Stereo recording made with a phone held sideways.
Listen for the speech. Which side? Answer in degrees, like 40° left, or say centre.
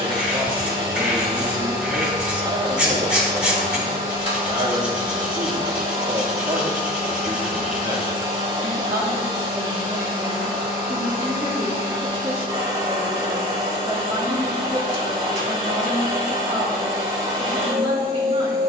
30° right.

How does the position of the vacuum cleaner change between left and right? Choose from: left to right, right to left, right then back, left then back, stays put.
stays put.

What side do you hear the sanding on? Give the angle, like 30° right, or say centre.
10° right.